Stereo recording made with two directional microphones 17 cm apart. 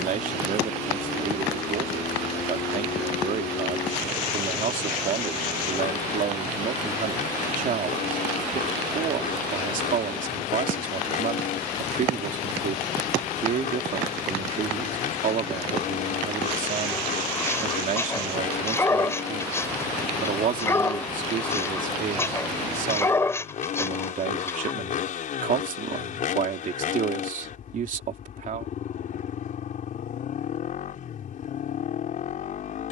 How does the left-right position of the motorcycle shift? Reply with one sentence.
You can hear the motorcycle stay in one place.